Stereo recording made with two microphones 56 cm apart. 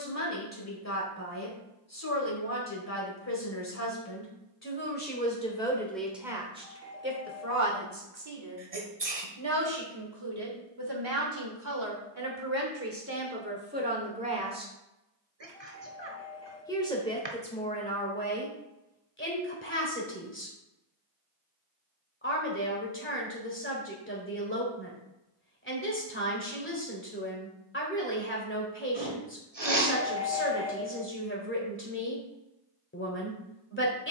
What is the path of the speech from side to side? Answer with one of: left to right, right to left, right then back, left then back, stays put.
right then back.